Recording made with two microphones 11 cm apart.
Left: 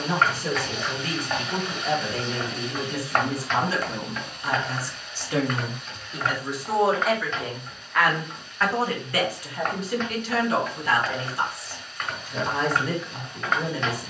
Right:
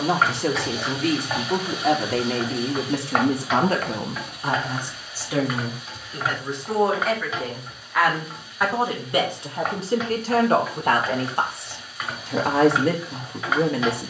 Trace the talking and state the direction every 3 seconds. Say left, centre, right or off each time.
right, right, centre, right, right.